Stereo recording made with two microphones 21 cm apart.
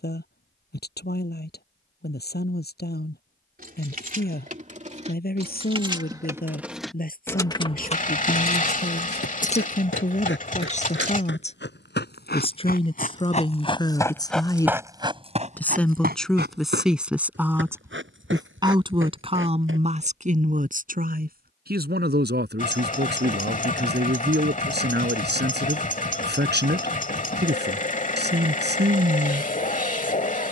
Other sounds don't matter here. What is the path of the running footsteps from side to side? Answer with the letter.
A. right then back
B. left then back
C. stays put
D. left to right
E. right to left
D.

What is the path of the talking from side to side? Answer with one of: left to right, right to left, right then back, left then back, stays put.
left to right.